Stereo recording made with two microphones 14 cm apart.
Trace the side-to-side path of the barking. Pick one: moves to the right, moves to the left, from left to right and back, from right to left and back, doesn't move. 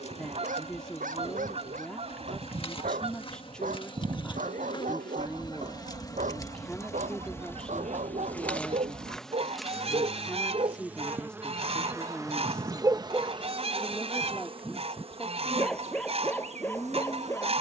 moves to the left.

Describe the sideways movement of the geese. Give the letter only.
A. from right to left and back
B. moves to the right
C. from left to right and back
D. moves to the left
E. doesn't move
E.